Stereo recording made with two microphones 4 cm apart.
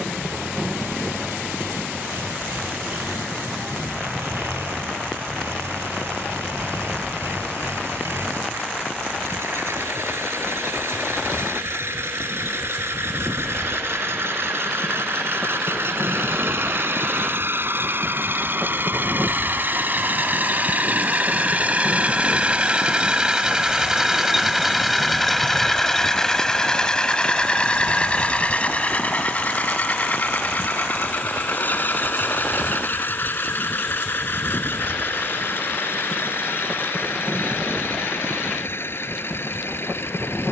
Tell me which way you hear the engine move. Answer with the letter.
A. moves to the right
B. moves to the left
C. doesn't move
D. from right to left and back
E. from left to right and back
B.